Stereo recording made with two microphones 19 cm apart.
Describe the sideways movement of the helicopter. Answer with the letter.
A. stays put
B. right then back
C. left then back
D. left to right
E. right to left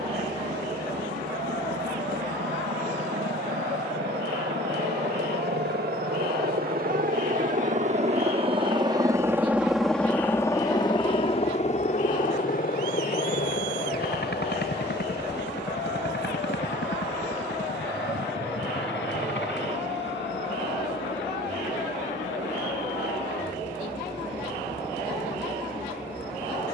E.